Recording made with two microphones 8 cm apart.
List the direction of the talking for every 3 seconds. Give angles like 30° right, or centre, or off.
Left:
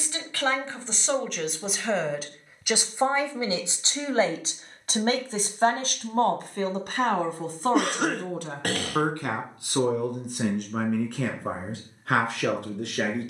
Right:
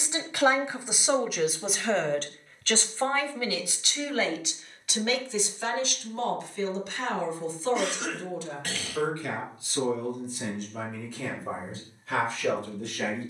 centre, 40° left, 60° left, 70° left, 80° left.